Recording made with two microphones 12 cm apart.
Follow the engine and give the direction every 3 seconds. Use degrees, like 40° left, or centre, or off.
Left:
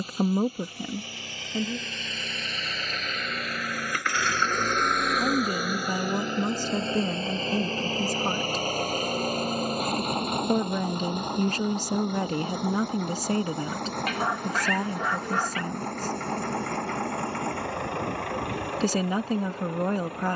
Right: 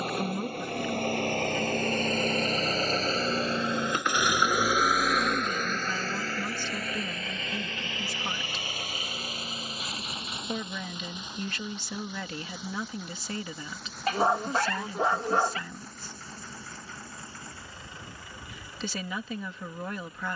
50° right, 10° right, 30° left, 50° left, 60° left, 70° left, 70° left.